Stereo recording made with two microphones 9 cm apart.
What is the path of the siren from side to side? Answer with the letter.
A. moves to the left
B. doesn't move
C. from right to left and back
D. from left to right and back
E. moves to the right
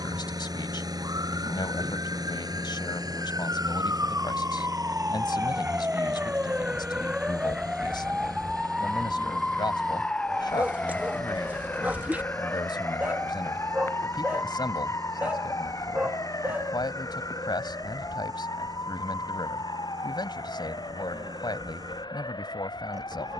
A.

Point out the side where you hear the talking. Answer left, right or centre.
left.